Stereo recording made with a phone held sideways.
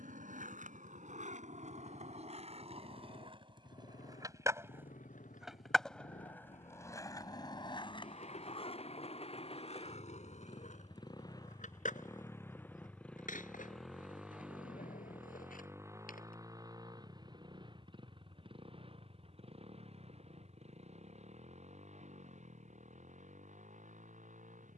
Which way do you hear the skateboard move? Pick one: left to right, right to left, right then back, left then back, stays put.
right to left.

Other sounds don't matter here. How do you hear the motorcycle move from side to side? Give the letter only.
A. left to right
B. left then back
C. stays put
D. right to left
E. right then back
A.